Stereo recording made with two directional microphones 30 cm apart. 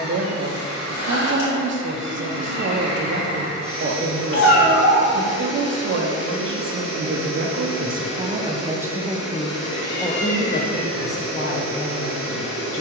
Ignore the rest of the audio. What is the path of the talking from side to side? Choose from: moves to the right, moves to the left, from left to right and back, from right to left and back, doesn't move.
moves to the left.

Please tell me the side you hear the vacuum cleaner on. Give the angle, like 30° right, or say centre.
60° left.